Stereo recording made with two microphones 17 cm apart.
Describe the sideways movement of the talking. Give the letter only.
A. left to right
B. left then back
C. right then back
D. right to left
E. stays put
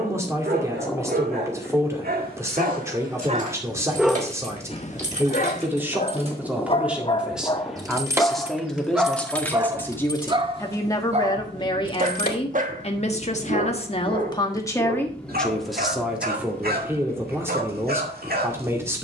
B.